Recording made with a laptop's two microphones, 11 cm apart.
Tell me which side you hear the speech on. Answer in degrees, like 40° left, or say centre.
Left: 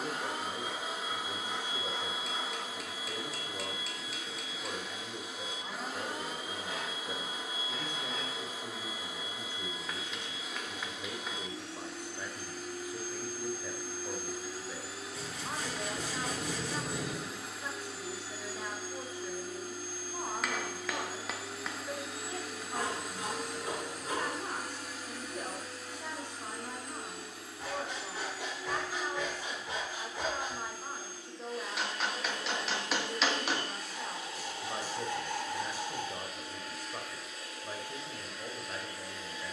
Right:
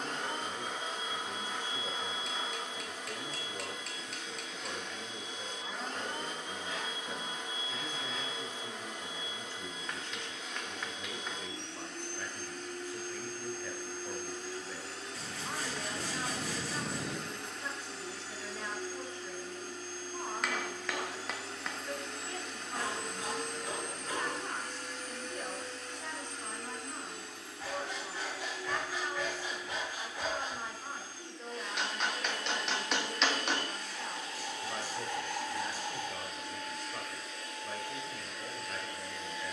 10° left.